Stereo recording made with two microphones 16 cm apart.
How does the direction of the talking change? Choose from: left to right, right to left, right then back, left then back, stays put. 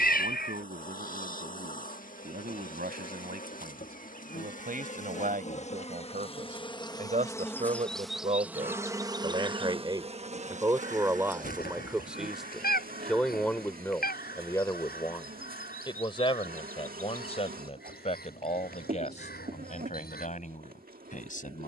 right to left.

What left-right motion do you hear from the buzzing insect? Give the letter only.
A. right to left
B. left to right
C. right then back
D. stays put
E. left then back
B.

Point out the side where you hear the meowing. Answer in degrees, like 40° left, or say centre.
70° left.